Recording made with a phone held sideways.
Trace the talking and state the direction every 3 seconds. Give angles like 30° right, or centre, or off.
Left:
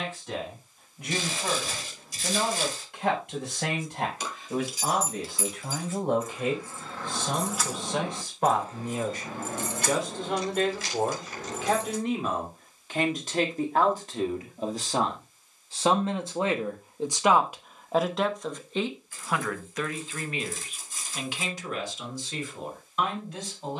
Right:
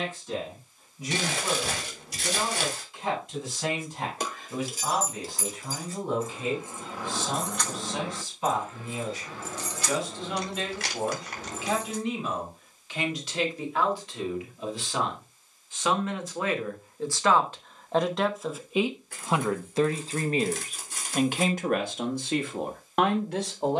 60° left, 60° left, 60° left, 60° left, 50° left, 20° left, 20° right, 60° right.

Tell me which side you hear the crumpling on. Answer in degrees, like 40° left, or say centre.
70° right.